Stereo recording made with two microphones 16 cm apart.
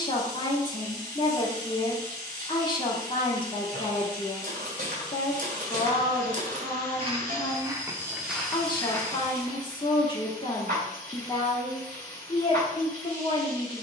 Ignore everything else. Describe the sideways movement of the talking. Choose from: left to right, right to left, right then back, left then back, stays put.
stays put.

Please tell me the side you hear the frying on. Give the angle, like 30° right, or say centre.
60° right.